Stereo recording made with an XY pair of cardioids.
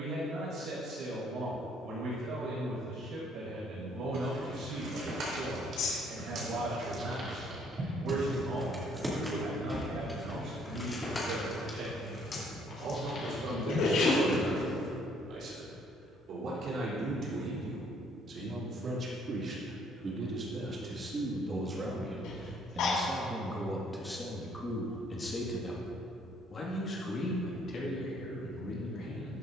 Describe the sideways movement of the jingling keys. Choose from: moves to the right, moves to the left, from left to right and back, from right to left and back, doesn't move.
moves to the left.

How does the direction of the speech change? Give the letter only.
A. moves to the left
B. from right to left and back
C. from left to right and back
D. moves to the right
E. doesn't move
A.